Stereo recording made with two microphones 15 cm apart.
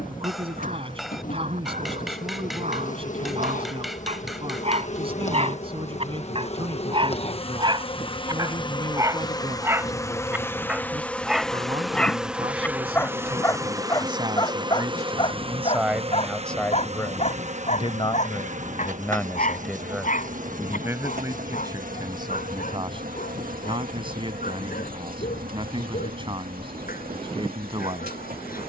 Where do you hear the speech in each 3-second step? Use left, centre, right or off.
right, right, right, right, right, centre, centre, right, right, right.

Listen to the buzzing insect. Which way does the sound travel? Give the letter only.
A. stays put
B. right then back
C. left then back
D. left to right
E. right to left
D.